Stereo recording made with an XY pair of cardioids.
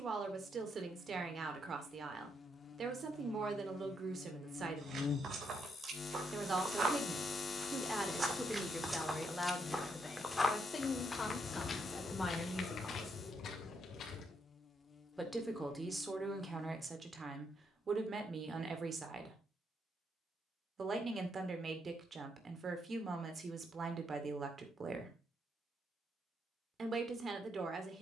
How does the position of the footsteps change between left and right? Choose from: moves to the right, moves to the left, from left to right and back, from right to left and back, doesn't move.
moves to the left.